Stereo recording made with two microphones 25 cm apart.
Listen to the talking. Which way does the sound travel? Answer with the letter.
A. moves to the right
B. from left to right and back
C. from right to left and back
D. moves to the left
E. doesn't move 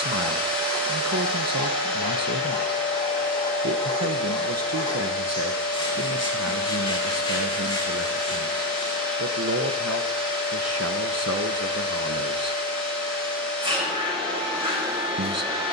E.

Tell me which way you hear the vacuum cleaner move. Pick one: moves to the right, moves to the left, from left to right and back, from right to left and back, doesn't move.
doesn't move.